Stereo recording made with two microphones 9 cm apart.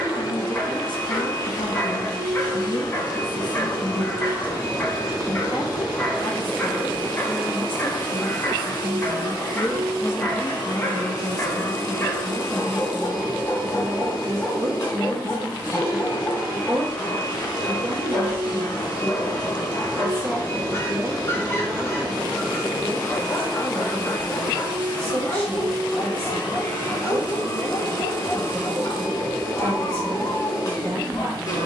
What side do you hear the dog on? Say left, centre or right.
left.